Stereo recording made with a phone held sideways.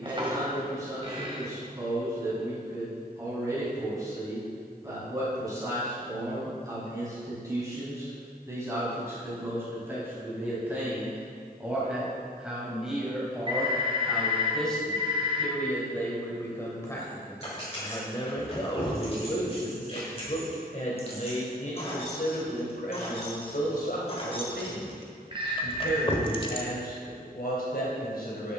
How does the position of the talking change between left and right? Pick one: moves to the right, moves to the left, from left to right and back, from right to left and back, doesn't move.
moves to the left.